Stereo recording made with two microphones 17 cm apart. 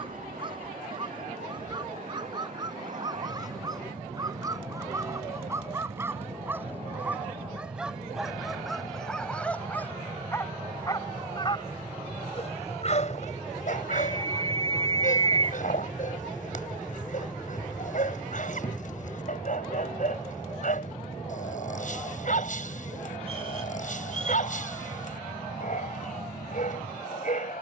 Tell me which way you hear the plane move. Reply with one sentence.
In this clip you hear the plane travel towards the left.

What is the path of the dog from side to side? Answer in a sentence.
In this clip you hear the dog travel towards the left.